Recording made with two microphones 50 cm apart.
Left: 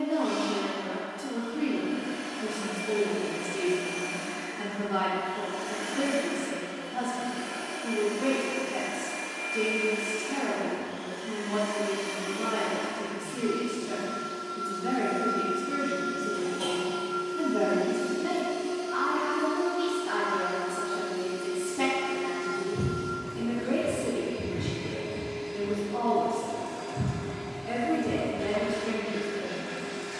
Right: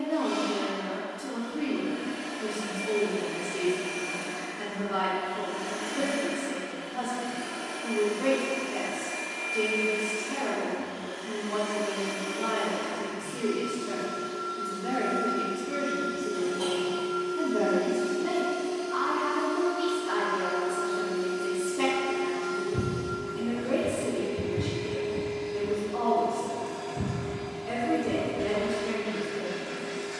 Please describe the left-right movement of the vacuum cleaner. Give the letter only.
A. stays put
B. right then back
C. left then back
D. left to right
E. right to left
B.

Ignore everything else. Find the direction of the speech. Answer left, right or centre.
centre.